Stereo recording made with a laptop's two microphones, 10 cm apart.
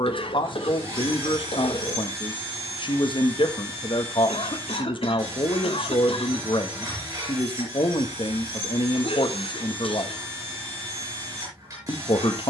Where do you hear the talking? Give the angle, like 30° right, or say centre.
60° left.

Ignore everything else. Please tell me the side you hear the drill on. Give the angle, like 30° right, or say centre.
40° right.